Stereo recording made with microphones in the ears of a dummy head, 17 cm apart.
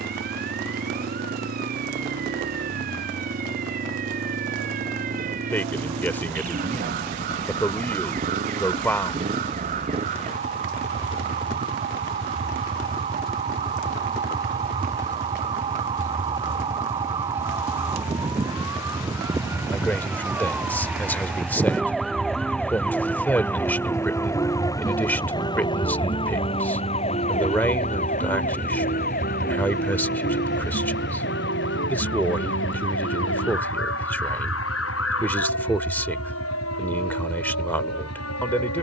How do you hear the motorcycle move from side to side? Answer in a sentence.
In this clip you hear the motorcycle move from right to left.